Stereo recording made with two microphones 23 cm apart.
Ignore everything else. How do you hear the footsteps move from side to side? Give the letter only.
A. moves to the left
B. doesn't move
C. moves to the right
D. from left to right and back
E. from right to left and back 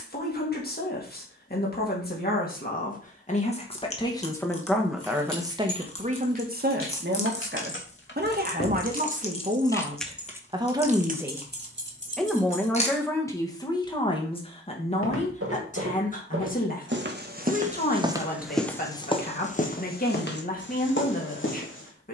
A.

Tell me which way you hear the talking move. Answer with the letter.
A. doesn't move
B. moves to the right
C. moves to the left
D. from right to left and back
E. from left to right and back
E.